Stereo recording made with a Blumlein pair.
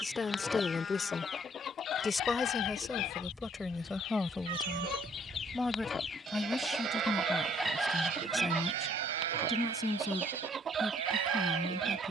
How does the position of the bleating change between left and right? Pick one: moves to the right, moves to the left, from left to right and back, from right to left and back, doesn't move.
moves to the right.